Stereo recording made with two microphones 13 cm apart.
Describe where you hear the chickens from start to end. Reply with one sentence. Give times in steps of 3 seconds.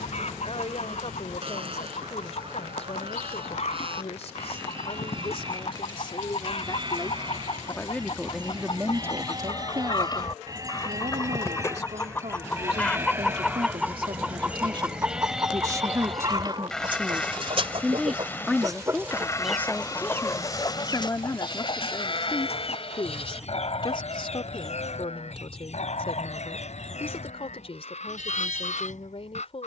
In this clip you hear the chickens on the left from 0 s, in the centre from 12 s, on the right from 15 s, in the centre from 18 s and on the left from 21 s.